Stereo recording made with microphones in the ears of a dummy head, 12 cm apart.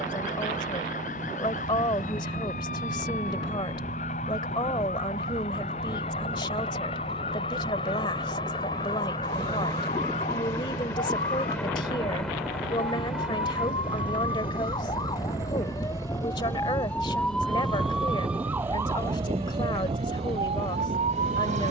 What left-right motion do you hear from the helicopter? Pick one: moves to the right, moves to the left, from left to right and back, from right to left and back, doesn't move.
moves to the right.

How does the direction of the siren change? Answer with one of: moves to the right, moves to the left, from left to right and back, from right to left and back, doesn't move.
moves to the right.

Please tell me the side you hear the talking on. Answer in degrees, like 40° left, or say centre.
30° left.